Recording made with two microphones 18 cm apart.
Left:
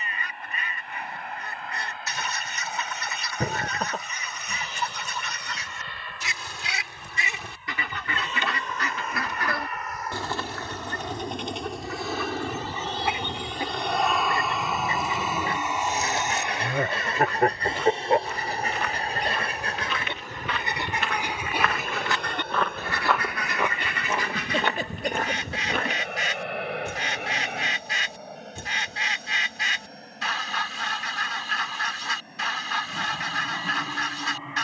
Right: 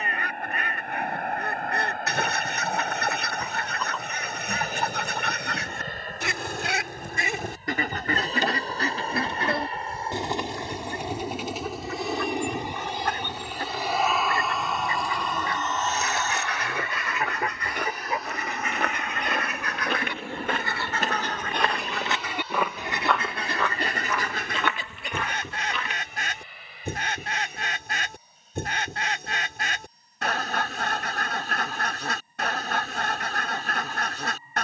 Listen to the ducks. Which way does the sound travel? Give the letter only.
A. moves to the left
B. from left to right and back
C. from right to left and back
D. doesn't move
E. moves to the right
C.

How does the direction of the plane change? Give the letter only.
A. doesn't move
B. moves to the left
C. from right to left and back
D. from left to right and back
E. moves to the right
B.